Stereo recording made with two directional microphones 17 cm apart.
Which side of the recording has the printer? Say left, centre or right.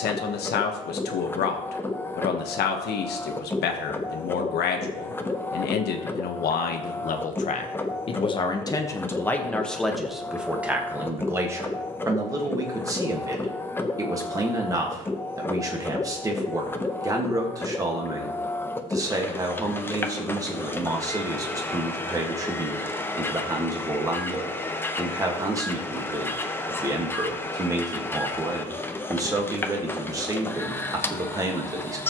centre.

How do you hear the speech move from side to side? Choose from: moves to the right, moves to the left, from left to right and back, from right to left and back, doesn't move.
moves to the right.